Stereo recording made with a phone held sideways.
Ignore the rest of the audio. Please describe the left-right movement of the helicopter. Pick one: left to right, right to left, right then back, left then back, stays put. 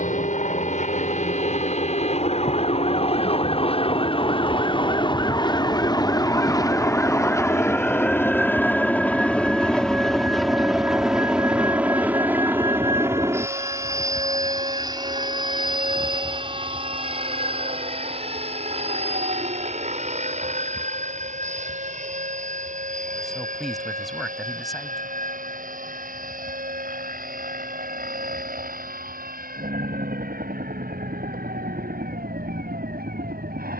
left to right.